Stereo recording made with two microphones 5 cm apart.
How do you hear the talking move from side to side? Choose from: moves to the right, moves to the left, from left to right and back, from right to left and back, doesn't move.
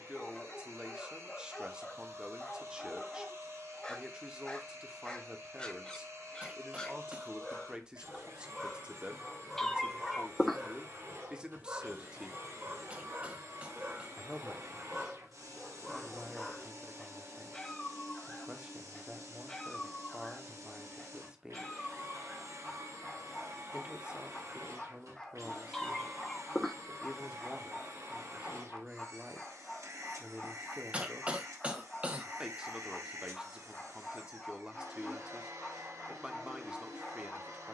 doesn't move.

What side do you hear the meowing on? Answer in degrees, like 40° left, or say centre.
10° left.